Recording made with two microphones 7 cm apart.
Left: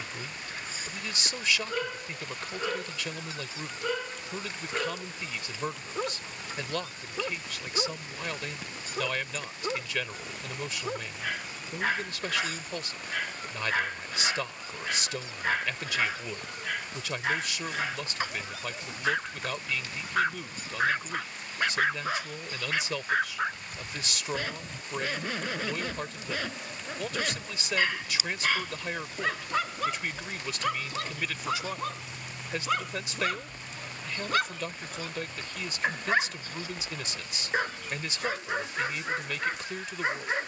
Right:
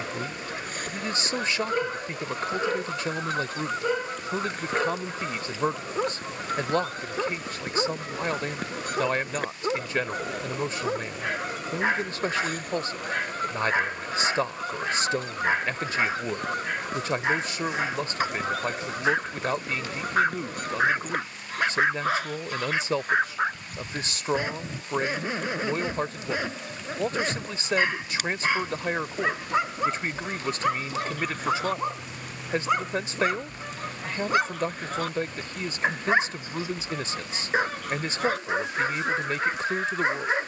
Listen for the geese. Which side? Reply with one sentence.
In this clip you hear the geese on the right.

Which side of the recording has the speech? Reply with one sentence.
You can hear the speech on the right.